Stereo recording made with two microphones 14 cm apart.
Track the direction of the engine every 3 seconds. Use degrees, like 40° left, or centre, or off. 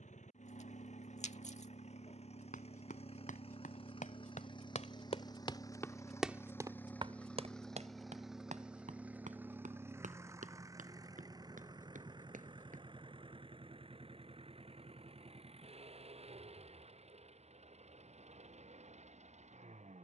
60° left, 40° left, 10° left, 20° right, 40° right, 50° right, 60° right.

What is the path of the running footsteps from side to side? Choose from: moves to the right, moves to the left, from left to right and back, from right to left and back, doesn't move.
moves to the right.